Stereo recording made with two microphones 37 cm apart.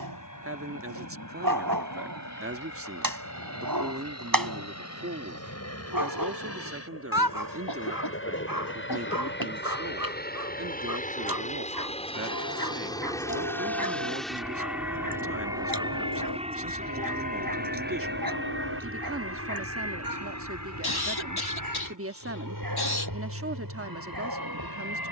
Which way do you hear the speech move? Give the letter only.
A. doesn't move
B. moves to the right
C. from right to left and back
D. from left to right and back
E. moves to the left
A.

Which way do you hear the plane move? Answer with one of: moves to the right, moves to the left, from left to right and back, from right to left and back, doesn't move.
moves to the right.